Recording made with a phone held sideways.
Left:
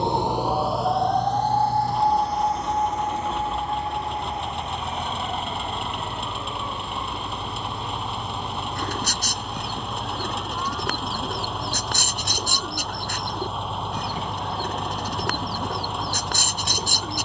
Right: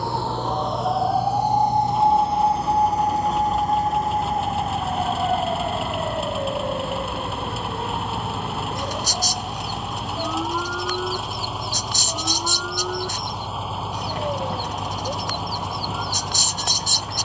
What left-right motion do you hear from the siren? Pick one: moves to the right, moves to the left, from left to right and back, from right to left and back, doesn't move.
moves to the right.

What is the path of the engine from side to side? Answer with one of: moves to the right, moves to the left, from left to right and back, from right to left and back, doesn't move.
doesn't move.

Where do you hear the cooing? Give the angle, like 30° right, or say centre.
60° left.